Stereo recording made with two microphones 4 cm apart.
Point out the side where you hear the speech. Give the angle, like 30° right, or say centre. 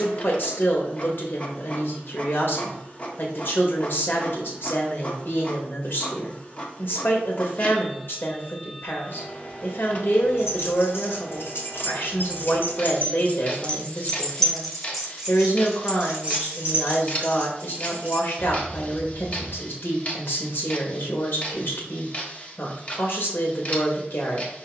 60° left.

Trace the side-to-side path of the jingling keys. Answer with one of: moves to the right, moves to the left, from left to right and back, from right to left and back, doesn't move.
moves to the right.